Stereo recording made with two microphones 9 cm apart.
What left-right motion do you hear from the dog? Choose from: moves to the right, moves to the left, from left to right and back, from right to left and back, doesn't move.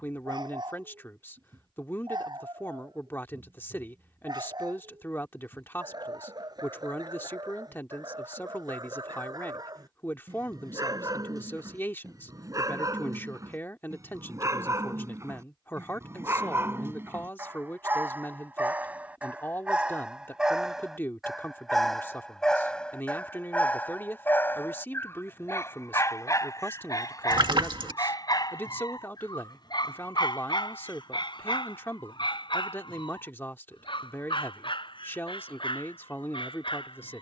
moves to the left.